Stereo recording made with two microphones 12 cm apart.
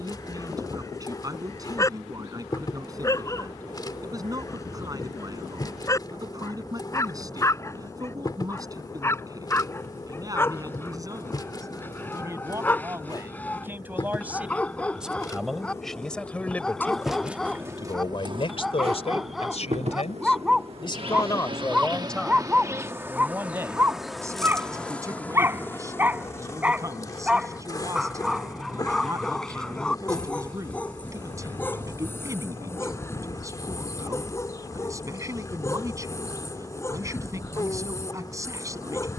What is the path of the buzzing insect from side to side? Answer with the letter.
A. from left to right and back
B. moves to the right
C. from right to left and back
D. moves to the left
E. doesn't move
A.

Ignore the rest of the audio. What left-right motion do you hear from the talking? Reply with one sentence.
You can hear the talking go left and come back.